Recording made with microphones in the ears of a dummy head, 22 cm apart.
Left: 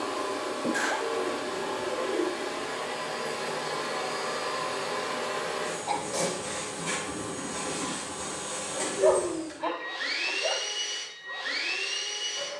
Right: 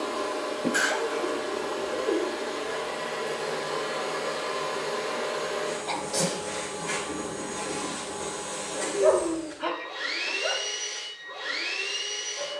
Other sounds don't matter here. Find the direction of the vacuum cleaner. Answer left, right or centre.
left.